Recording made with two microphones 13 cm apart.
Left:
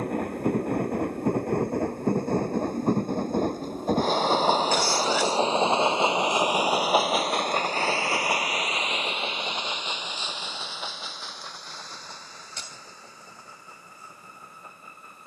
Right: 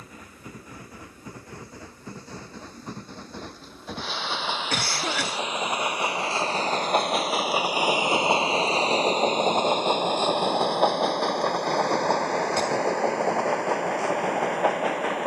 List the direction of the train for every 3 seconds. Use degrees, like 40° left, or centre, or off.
60° left, 40° left, 10° right, 50° right, 70° right.